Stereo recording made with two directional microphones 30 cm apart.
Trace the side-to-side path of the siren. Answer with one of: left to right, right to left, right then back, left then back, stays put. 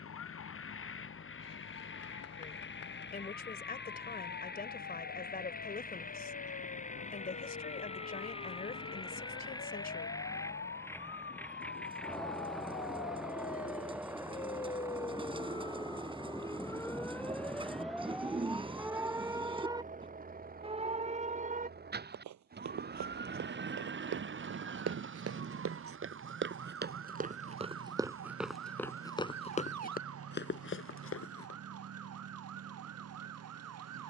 left to right.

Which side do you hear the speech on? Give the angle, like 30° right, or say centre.
30° left.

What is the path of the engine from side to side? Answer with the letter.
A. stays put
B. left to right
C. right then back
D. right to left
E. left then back
B.